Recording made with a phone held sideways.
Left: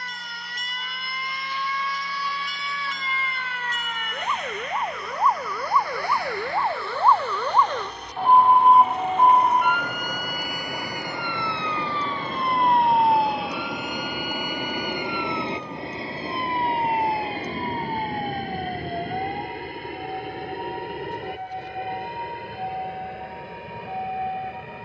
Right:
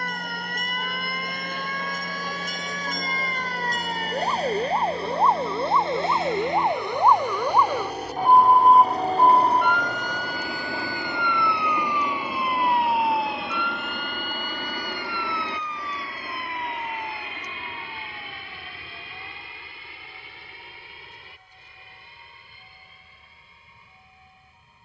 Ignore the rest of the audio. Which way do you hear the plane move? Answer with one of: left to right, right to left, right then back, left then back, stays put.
right to left.